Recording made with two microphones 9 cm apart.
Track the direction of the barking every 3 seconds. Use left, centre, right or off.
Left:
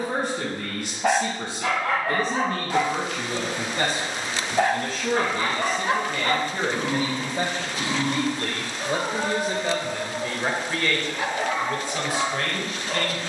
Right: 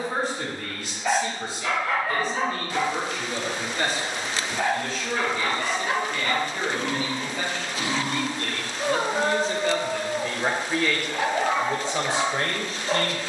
left, left, centre, right, right.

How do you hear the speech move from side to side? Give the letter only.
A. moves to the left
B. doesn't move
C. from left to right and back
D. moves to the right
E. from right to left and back
D.